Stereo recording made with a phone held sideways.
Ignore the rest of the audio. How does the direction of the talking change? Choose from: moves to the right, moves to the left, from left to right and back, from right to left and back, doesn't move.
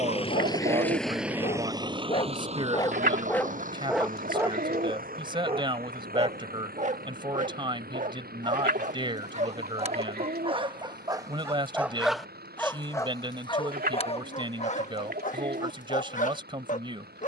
doesn't move.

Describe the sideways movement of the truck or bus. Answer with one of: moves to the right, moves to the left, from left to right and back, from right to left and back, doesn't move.
moves to the right.